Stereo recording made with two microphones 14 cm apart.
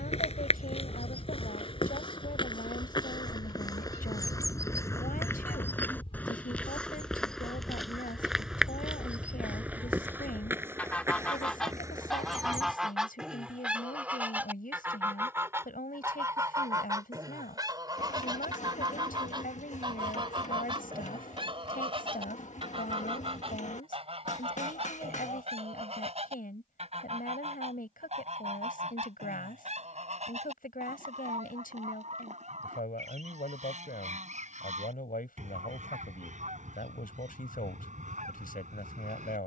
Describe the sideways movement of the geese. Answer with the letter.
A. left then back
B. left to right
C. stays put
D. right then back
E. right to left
B.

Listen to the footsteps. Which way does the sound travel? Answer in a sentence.
In this clip you hear the footsteps go from the left side to the right.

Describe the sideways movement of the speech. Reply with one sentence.
In this clip you hear the speech stay in one place.